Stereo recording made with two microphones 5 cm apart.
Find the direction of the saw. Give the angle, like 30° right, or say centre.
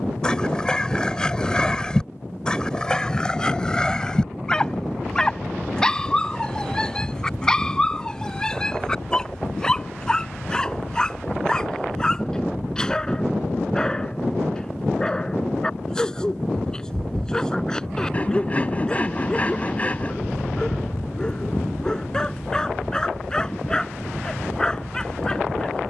30° left.